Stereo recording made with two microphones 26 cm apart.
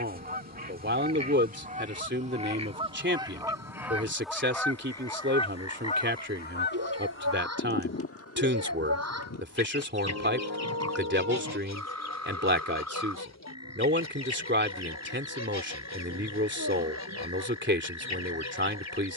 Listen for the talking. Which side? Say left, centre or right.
right.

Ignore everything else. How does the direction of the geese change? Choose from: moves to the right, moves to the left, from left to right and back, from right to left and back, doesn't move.
moves to the left.